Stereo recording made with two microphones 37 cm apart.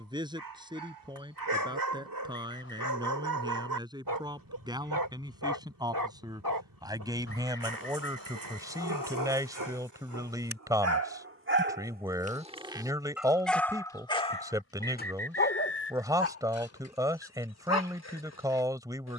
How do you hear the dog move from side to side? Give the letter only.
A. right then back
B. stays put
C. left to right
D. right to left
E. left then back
D.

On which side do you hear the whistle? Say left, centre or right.
left.